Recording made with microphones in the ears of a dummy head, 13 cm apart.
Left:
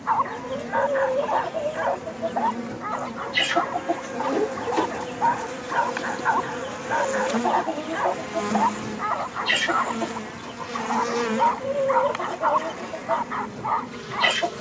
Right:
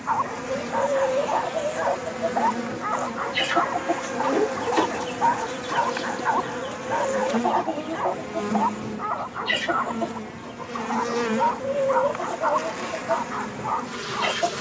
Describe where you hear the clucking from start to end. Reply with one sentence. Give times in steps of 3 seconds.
In this clip you hear the clucking on the left from 0 s, in the centre from 3 s and on the left from 9 s.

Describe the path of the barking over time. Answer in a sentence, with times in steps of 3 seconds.
You can hear the barking on the left from 0 s, in the centre from 3 s and on the left from 6 s.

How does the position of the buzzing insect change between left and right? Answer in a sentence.
In this clip you hear the buzzing insect go left and come back.